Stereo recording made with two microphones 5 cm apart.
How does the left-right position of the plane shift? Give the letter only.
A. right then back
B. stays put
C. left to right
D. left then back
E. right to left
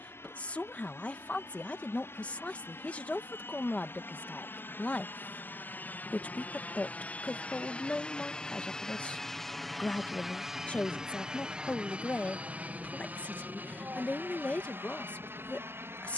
C.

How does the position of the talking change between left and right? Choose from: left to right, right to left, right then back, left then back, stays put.
stays put.